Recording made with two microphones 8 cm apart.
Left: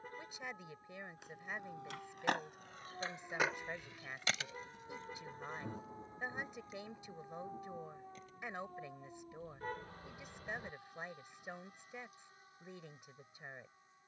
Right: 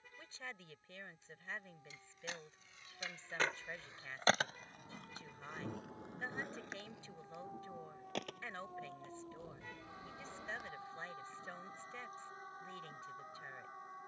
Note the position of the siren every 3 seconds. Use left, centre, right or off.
left, left, centre, right, right.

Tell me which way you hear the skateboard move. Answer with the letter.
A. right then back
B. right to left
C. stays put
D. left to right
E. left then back
D.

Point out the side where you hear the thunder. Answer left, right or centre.
centre.